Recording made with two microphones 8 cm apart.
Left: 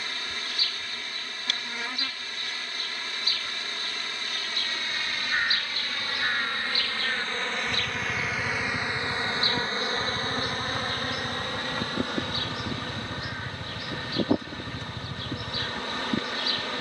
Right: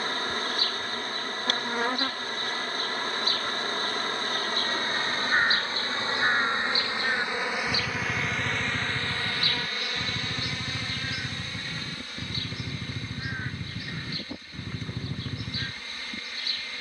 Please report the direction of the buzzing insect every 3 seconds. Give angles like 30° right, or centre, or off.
40° right, 40° right, 10° right, 40° left, 60° left, 60° left.